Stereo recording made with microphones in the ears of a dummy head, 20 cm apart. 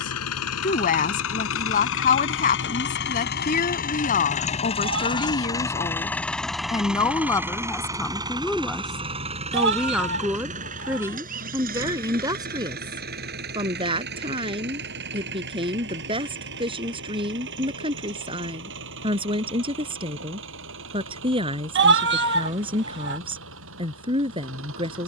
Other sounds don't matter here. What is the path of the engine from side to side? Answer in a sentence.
In this clip you hear the engine go from the left side to the right.